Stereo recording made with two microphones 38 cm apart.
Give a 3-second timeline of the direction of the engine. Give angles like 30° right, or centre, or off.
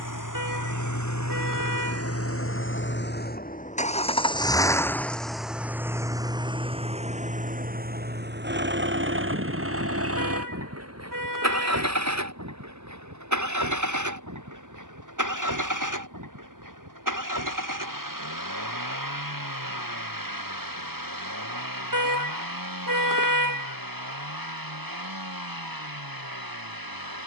40° left, 10° left, 20° right, 40° right, 50° right, 50° right, 60° right, 60° right, 60° right.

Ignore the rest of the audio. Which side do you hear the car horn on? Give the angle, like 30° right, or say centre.
60° right.